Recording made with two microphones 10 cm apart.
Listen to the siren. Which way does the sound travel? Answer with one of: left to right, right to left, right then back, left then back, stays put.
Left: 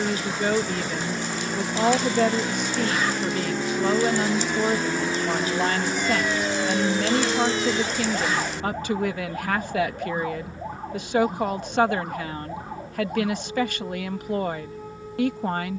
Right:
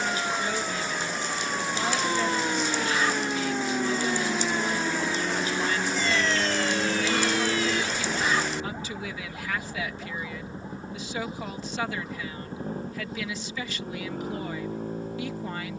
right to left.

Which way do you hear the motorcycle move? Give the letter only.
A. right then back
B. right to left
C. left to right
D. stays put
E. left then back
C.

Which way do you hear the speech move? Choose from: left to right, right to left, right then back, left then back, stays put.
stays put.